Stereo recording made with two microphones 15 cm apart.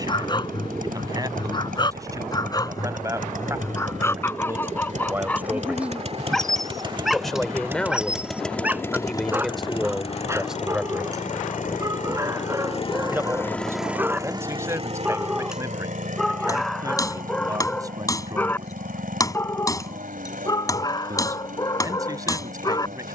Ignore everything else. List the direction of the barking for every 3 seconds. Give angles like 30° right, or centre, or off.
30° left, 10° left, centre, 20° right, 20° right, centre, 20° left, 30° left.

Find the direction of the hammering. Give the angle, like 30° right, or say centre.
20° left.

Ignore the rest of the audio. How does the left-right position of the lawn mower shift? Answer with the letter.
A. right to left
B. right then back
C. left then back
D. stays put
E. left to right
C.